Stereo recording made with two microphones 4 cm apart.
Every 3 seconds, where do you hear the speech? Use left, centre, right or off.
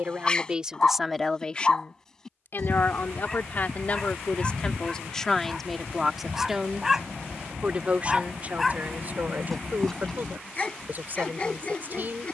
centre, left, right, right.